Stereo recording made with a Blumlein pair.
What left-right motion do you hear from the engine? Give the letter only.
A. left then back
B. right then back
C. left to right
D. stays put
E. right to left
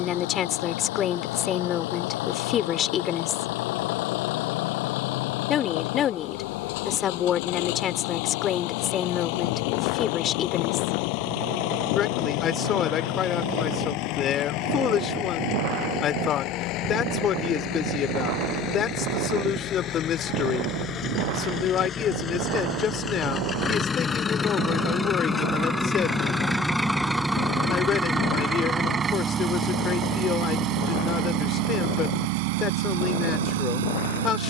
C.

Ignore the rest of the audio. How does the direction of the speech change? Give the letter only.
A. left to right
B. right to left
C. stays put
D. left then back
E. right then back
C.